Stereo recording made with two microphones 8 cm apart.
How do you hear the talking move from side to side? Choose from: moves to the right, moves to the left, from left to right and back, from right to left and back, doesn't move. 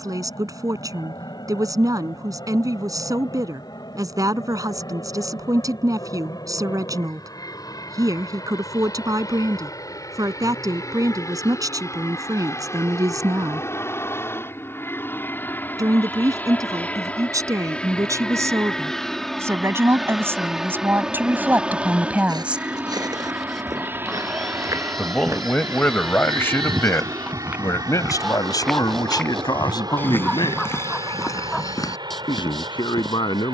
moves to the left.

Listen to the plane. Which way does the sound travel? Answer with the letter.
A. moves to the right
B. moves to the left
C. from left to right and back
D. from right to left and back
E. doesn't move
A.